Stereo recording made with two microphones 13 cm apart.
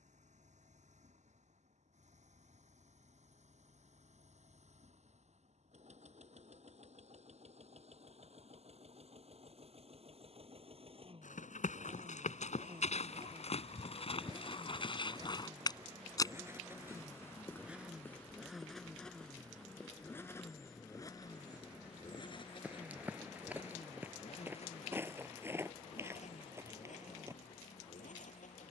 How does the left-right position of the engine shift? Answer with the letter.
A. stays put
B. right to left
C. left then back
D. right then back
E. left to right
B.